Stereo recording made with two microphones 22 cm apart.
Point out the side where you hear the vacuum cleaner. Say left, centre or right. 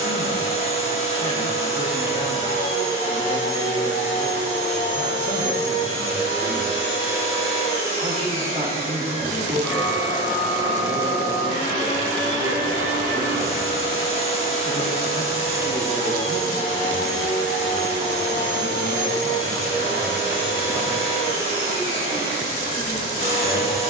left.